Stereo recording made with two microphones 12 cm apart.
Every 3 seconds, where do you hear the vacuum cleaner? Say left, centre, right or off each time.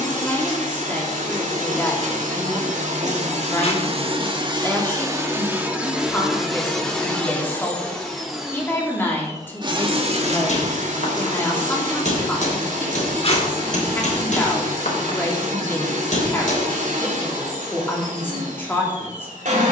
right, right, centre, right, right, right, right.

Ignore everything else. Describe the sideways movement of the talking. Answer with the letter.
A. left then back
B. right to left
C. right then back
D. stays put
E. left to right
D.